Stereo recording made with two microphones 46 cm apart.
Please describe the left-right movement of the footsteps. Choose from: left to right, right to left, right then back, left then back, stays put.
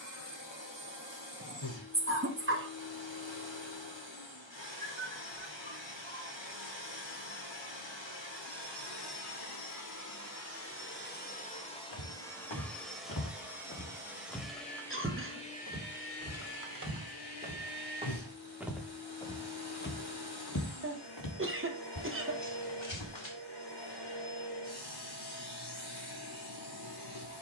right then back.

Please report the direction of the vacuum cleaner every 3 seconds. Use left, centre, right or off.
left, left, left, left, centre, left, left, left, left.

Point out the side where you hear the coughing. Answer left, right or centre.
right.